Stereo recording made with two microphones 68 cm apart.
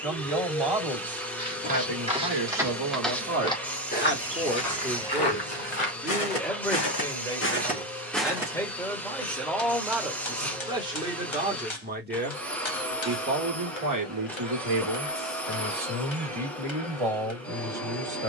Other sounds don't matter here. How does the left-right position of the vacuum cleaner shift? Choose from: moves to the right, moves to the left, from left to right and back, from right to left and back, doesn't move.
doesn't move.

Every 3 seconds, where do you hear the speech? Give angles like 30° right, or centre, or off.
40° right, 10° right, centre, centre, 30° right, 40° right.